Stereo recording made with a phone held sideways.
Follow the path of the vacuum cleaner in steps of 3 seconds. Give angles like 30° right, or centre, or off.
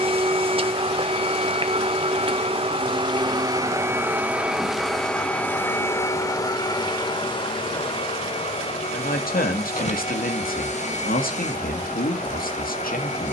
40° right, 10° right, 30° left, 50° left, 50° left.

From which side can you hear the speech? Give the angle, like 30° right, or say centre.
70° left.